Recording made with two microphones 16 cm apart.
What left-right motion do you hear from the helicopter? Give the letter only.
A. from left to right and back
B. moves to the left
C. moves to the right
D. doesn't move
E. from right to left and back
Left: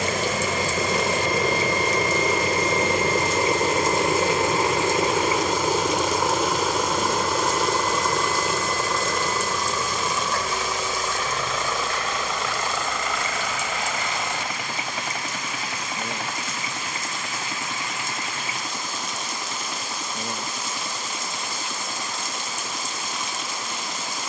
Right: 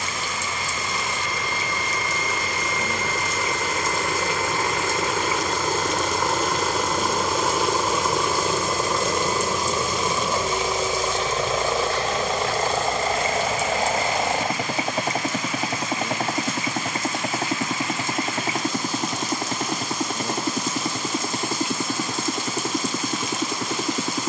C.